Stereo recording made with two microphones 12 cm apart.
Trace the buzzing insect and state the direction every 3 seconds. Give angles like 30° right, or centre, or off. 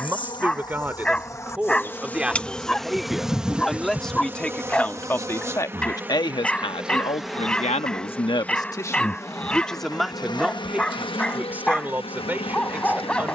20° left, 20° right, centre, 40° left, 50° left.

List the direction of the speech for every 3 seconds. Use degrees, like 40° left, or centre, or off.
10° right, 10° left, 50° left, centre, 10° right.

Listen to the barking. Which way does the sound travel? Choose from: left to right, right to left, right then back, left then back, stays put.
stays put.